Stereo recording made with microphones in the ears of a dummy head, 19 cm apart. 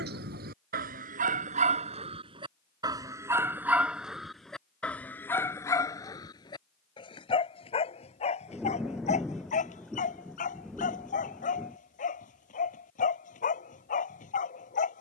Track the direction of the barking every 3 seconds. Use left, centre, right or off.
right, centre, left, left, left.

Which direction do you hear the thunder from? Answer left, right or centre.
centre.